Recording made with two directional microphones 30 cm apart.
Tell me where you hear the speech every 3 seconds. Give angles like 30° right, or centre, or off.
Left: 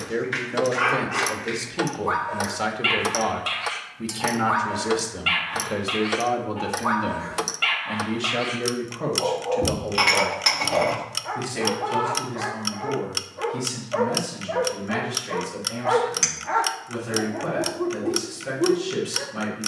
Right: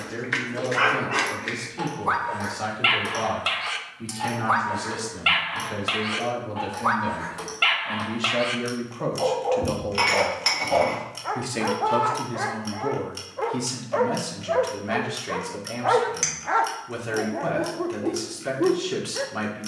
30° left, 30° left, 10° left, 20° right, 40° right, 40° right, 40° right.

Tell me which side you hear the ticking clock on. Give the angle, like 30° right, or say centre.
60° left.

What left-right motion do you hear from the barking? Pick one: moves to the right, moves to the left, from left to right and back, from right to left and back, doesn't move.
doesn't move.